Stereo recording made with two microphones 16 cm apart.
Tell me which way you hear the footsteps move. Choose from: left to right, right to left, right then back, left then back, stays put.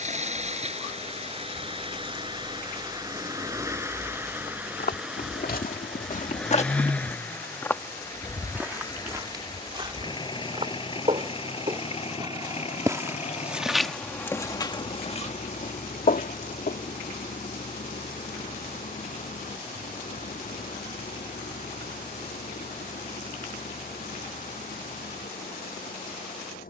right then back.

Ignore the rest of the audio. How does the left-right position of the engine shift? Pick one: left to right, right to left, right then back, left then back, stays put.
right to left.